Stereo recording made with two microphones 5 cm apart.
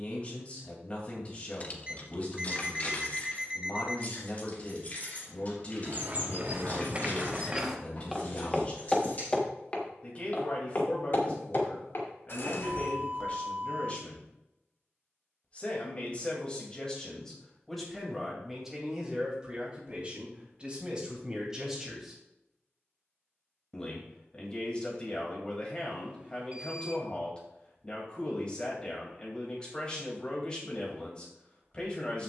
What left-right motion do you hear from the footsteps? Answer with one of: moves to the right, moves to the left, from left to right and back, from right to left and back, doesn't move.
moves to the left.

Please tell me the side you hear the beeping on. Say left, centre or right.
right.